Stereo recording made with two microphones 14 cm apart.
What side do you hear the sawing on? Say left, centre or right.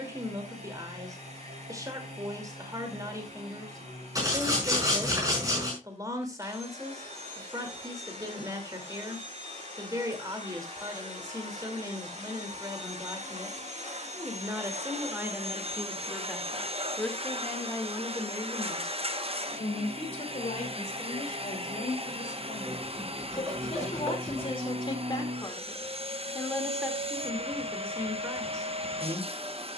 right.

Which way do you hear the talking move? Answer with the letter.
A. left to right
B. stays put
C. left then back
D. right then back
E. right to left
C.